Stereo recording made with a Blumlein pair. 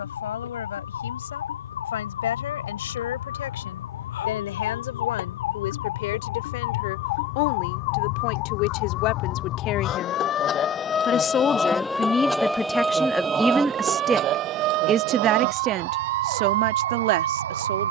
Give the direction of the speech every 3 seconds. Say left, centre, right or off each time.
left, left, left, left, centre, right.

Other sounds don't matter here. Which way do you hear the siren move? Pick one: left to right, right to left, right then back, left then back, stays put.
left to right.